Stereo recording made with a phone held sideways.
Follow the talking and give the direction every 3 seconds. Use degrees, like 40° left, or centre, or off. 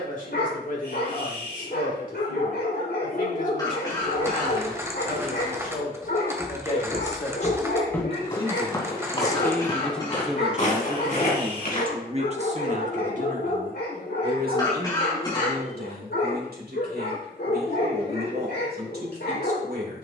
50° left, 50° left, 40° left, 10° right, 50° right, 70° right, 70° right.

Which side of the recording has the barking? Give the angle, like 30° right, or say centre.
80° left.